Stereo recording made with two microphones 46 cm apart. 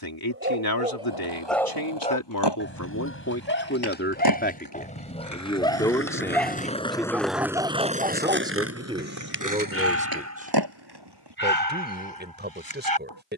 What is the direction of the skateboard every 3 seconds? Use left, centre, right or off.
left, left, centre, right, off.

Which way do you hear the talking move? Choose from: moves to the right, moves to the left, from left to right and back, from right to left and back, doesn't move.
moves to the right.